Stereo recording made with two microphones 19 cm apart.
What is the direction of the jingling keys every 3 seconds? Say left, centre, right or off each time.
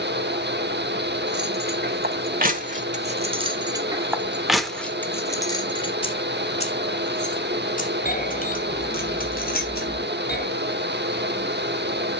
right, centre, left, left.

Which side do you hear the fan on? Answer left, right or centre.
right.